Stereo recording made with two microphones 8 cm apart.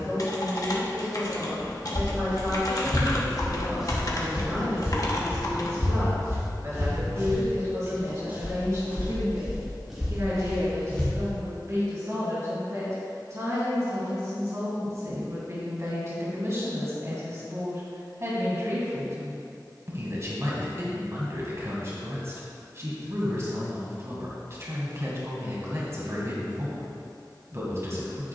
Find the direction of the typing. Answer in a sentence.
In this clip you hear the typing on the left.